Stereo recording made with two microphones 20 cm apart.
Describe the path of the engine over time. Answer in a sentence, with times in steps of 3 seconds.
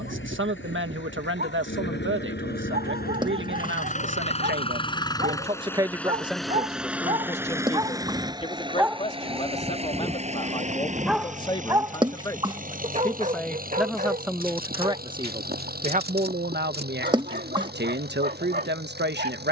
In this clip you hear the engine on the left from 0 s, in the centre from 6 s and on the right from 9 s.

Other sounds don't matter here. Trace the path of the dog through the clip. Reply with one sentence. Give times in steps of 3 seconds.
You can hear the dog on the right from 0 s, in the centre from 9 s and on the right from 12 s.